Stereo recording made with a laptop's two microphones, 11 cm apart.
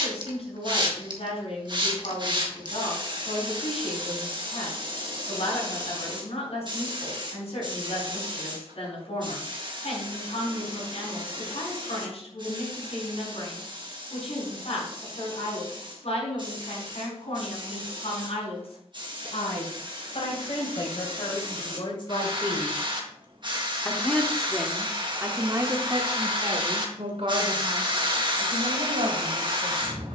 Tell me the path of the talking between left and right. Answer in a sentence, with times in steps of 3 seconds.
You can hear the talking on the left from 0 s and on the right from 24 s.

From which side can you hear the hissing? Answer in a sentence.
You can hear the hissing on the right.